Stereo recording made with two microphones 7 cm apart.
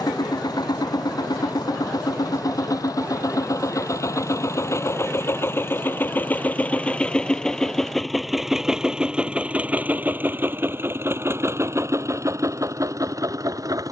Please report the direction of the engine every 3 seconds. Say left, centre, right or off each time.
left, left, centre, right, right.